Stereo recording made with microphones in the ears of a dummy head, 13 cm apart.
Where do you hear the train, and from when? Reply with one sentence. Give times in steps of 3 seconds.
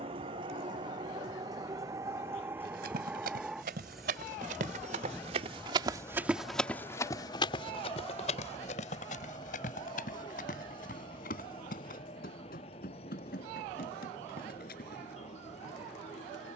In this clip you hear the train on the right from 0 s, in the centre from 3 s and on the left from 6 s.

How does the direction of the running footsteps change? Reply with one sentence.
In this clip you hear the running footsteps move to the left.